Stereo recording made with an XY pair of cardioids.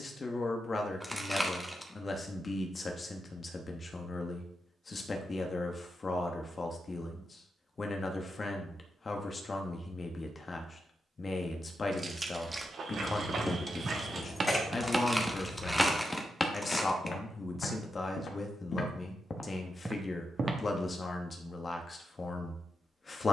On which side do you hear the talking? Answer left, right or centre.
left.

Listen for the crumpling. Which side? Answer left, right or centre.
centre.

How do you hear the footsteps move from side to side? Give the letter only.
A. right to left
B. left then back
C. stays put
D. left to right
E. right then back
B.